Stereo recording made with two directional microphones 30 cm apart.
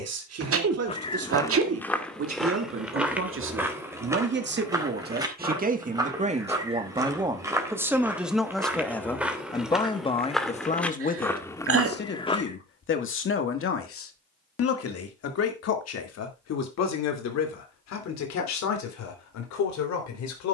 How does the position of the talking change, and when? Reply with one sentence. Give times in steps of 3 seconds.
You can hear the talking on the right from 0 s, in the centre from 6 s and on the left from 9 s.